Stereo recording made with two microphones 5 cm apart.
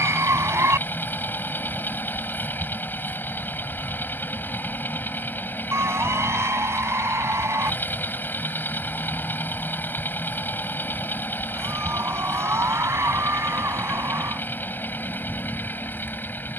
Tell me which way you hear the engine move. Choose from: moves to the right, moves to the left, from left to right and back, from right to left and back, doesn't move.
doesn't move.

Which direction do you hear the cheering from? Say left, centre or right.
right.